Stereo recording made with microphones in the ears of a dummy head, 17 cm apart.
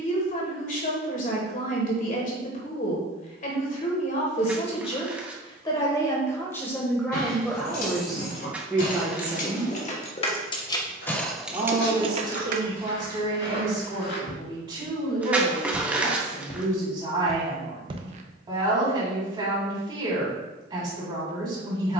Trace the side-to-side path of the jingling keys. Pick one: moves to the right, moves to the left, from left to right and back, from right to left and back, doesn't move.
moves to the right.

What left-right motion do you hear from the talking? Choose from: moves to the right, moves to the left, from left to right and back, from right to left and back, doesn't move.
moves to the right.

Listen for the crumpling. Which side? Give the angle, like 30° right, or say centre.
10° right.